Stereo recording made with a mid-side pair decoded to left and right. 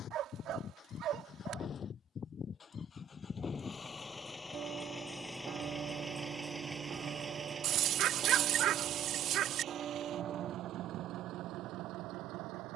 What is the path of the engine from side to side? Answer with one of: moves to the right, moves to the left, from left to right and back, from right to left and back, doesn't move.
moves to the right.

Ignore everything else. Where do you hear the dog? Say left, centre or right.
right.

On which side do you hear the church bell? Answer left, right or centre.
right.